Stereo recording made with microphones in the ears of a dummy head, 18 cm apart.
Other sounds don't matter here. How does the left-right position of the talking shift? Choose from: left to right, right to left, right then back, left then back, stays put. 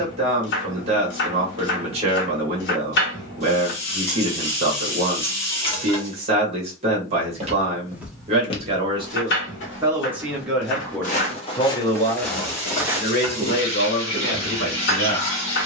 right to left.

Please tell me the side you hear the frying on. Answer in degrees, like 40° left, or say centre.
30° left.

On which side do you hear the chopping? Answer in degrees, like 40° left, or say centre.
60° left.